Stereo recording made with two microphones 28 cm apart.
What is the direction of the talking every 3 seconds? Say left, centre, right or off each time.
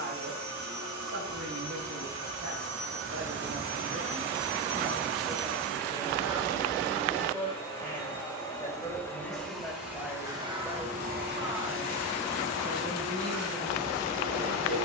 right, right, centre, centre, right.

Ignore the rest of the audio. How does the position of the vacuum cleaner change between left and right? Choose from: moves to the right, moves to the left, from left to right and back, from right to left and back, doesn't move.
from right to left and back.